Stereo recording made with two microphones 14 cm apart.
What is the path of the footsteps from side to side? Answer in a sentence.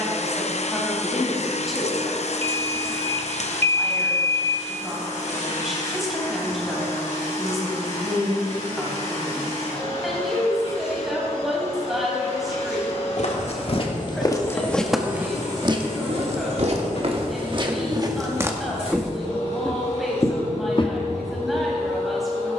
You can hear the footsteps move from left to right and back again.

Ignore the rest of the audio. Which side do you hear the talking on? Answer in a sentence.
You can hear the talking in the centre.